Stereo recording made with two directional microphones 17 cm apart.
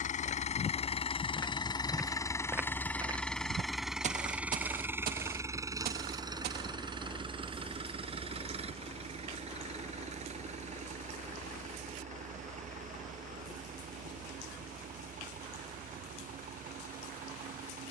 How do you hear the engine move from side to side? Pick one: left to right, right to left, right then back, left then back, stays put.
left to right.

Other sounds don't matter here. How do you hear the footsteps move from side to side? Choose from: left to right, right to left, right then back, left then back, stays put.
left to right.